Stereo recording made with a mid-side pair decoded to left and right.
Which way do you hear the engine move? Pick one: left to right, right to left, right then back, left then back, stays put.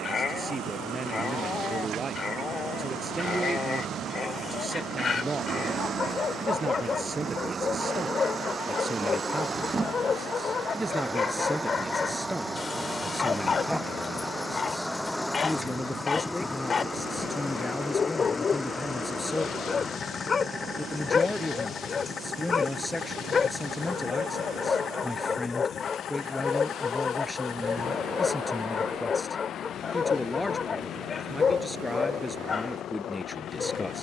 right to left.